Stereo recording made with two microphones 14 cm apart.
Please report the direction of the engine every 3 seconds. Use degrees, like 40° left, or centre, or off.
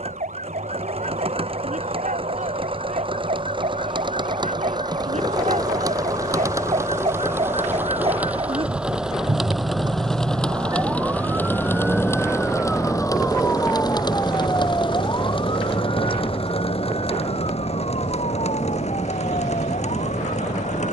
40° right, 30° right, 20° right, 10° left, 30° left, 50° left, 60° left.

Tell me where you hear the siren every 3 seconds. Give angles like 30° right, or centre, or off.
70° right, 60° right, 50° right, 30° right, 10° left, 40° left, 60° left.